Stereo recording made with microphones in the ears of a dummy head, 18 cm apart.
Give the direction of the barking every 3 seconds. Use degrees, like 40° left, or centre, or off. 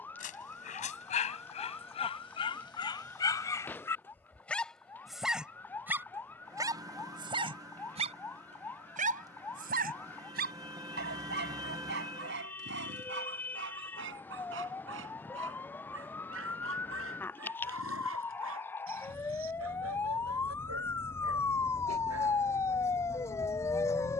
30° left, 10° left, 30° right, 50° right, 60° right, 70° right, 80° right, 80° right.